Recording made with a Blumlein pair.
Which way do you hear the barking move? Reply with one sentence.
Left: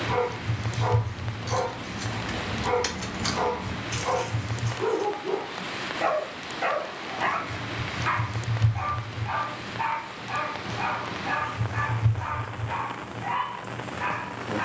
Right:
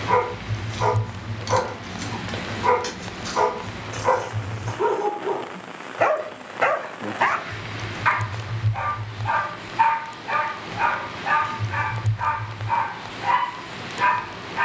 You can hear the barking stay in one place.